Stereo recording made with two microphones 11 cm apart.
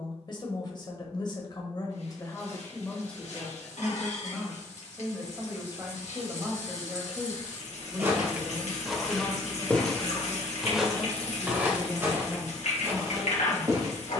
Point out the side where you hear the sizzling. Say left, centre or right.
left.